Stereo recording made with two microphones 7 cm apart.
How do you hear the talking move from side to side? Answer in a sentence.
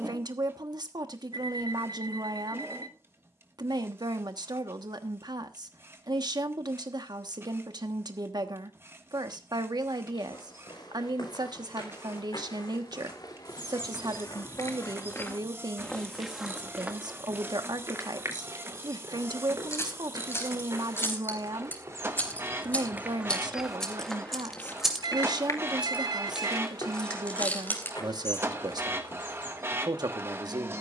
You can hear the talking stay put.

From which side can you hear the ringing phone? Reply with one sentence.
You can hear the ringing phone on the right.